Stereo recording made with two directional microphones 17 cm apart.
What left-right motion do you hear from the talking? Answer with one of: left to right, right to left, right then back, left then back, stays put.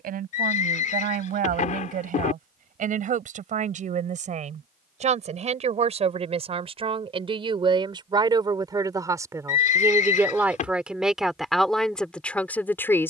right to left.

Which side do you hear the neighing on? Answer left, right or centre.
left.